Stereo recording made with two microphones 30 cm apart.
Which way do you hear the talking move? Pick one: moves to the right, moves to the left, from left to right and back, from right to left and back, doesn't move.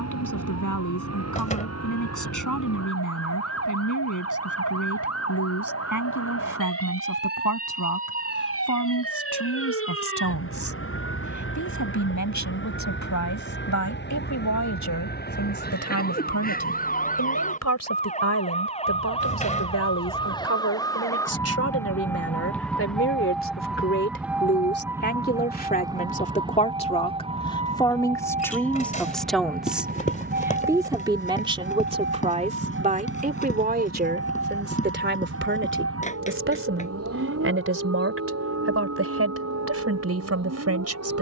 moves to the right.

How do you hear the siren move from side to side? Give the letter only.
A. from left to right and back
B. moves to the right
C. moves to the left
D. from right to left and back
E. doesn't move
B.